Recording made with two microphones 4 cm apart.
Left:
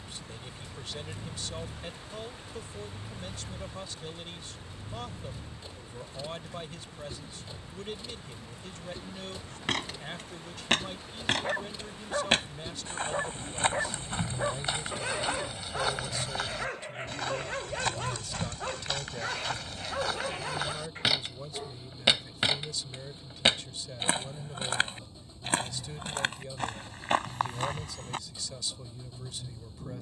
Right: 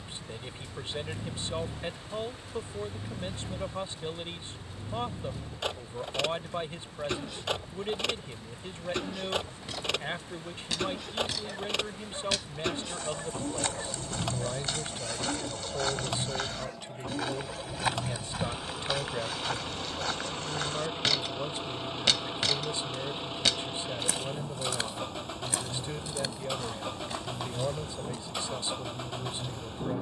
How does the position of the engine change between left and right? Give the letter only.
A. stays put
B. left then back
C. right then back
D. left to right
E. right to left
A.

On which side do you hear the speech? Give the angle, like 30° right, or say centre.
30° right.